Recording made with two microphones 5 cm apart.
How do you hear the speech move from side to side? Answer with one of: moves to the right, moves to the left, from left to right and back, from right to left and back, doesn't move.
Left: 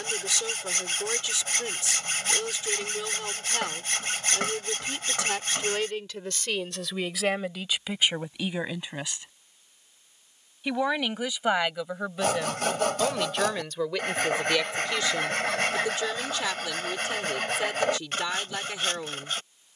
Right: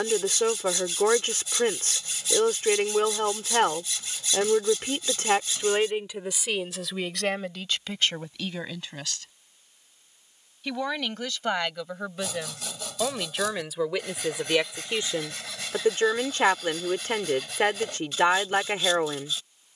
from right to left and back.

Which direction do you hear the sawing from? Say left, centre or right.
left.